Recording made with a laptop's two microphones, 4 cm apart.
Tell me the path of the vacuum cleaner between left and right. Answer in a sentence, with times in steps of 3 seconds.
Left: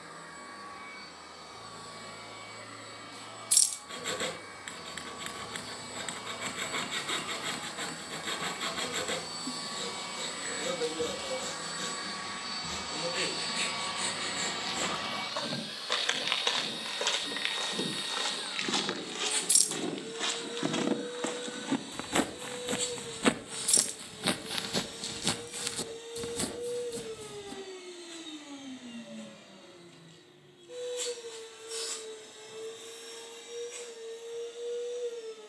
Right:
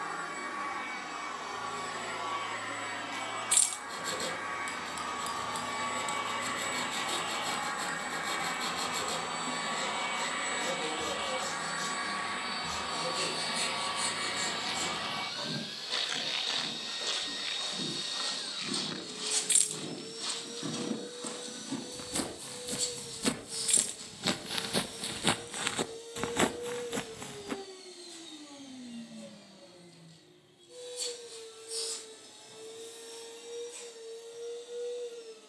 You can hear the vacuum cleaner on the right from 0 s, in the centre from 12 s and on the left from 18 s.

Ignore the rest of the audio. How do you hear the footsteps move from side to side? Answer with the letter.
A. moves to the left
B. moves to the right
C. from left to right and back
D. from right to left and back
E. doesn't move
B.